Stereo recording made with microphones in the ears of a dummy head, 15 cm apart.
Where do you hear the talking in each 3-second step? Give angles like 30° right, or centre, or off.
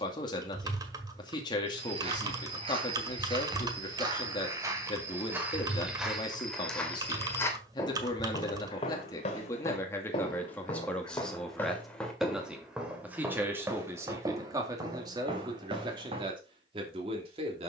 30° left, 30° left, 30° left, 10° left, 20° right, 30° right.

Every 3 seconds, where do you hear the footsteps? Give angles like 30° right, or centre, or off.
40° right, 20° right, 20° left, 30° left, 10° right, 30° right.